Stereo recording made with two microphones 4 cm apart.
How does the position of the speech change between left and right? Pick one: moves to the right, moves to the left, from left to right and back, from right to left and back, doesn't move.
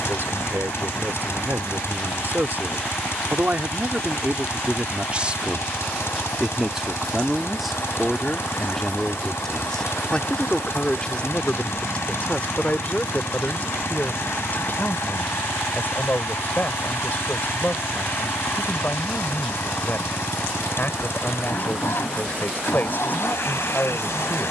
moves to the left.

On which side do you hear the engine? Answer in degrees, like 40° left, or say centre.
70° left.